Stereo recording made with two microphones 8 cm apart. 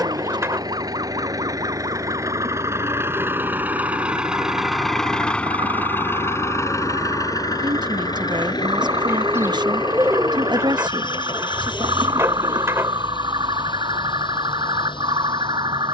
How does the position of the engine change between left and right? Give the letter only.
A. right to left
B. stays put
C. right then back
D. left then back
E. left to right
A.